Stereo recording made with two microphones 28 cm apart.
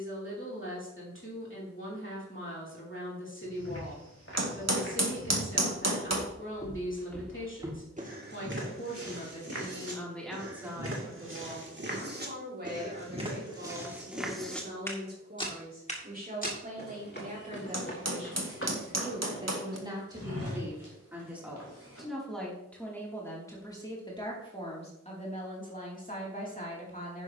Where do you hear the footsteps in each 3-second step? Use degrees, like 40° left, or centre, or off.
off, 60° left, 10° right, 50° right, 10° right, 30° left, 50° left, 60° left, off.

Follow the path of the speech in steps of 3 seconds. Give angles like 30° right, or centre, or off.
40° left, 40° left, 40° left, centre, 40° right, 30° right, 20° right, centre, 30° left.